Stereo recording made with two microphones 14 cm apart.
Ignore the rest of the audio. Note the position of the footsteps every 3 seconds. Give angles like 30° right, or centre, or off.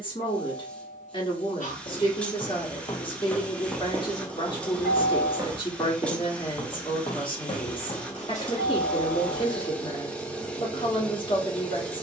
50° left, 10° right, 30° left, off.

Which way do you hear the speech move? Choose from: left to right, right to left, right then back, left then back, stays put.
stays put.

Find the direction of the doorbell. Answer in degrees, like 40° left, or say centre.
60° left.